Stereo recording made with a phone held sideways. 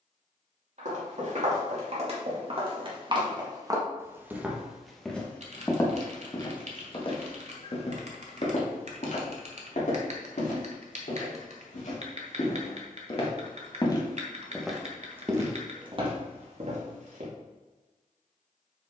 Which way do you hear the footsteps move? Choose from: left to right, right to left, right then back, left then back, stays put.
left then back.